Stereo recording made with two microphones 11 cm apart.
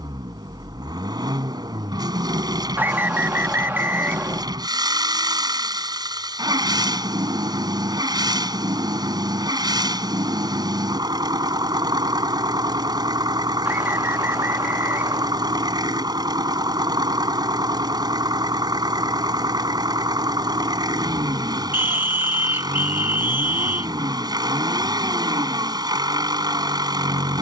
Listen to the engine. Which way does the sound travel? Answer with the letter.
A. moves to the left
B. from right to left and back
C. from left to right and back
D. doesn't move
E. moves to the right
D.